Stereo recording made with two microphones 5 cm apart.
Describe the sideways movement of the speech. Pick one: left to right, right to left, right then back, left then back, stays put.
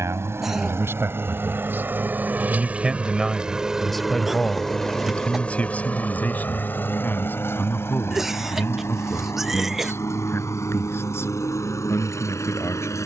right to left.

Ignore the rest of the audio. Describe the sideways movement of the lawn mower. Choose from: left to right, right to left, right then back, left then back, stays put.
right to left.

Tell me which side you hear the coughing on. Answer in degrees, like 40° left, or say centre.
centre.